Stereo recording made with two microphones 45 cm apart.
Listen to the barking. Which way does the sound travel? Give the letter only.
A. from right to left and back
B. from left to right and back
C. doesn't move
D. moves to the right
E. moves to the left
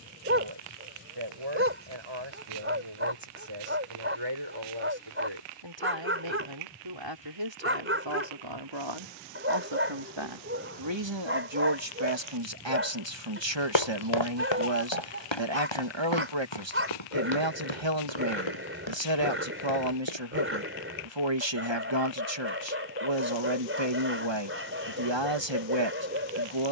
C.